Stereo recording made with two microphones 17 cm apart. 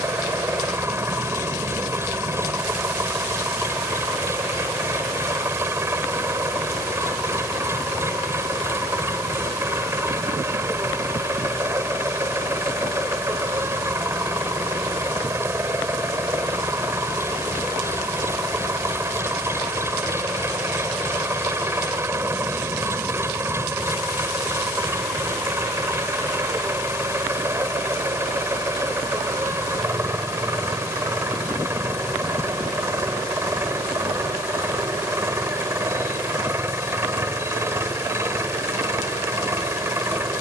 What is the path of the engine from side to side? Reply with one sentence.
You can hear the engine stay in one place.